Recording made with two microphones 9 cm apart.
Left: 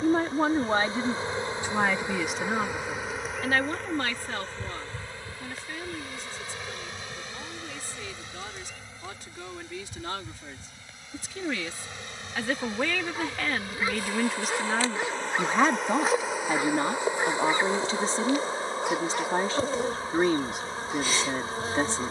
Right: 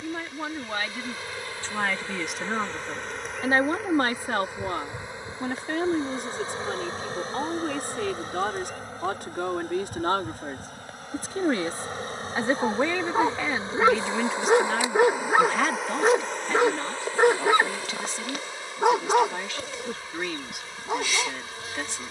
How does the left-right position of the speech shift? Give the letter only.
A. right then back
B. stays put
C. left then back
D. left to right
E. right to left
A.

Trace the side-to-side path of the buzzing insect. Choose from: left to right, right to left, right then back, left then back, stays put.
right then back.